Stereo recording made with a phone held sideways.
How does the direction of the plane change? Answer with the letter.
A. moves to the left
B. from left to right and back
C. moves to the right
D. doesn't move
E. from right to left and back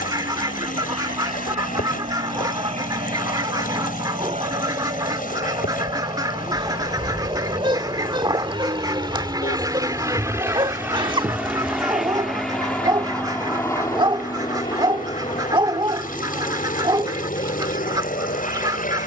A.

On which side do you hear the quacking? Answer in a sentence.
You can hear the quacking on the right.